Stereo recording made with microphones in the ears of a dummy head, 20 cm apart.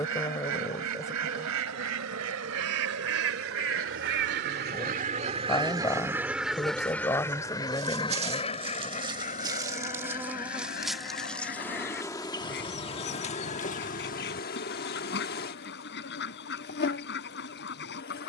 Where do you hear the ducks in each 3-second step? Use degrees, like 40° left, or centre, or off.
80° right, 40° right, 10° left, 40° left, 50° left, 50° left.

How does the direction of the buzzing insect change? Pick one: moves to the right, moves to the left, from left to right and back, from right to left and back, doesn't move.
moves to the left.